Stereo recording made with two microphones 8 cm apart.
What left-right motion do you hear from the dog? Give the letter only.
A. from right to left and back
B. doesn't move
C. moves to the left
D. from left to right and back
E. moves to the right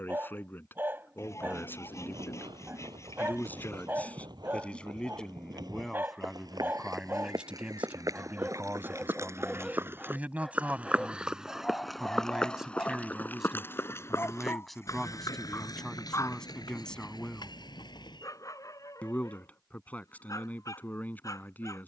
C.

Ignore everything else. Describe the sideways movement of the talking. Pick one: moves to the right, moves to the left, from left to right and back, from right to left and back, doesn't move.
from left to right and back.